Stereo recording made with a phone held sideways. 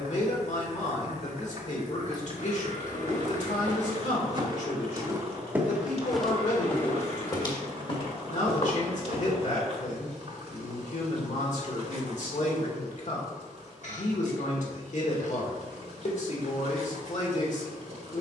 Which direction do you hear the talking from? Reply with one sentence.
You can hear the talking on the left.